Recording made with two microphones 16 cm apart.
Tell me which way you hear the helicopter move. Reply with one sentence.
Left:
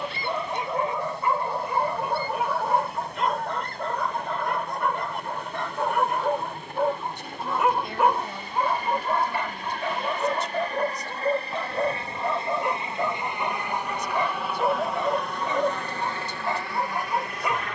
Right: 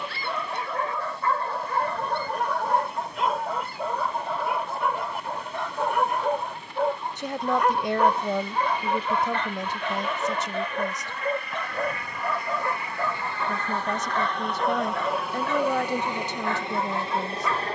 You can hear the helicopter move from left to right.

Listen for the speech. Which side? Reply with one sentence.
You can hear the speech on the right.